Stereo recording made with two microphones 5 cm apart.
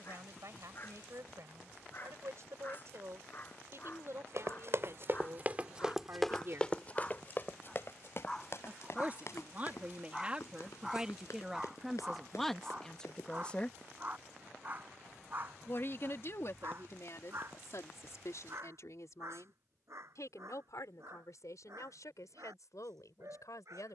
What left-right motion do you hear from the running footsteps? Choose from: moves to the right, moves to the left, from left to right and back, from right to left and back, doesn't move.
moves to the left.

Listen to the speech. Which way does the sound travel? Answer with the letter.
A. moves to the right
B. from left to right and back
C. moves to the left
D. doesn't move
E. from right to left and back
C.